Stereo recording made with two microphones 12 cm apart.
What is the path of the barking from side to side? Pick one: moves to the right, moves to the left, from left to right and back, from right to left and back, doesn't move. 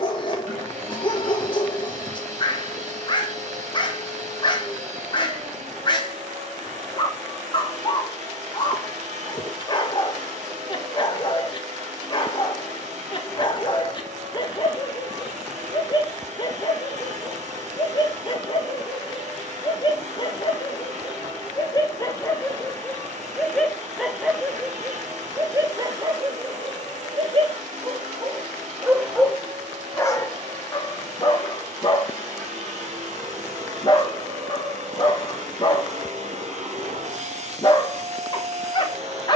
from left to right and back.